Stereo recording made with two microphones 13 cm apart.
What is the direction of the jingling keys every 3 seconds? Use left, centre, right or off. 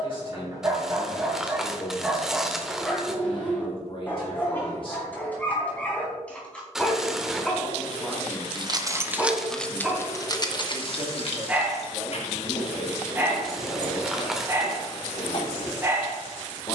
off, off, right, left, left, left.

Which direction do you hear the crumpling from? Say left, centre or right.
centre.